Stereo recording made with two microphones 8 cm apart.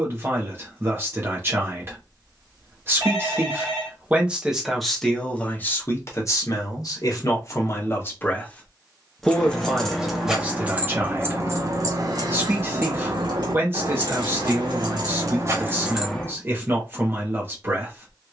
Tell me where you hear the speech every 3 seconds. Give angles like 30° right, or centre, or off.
30° right, centre, 40° left, 20° right, 30° right, 30° right.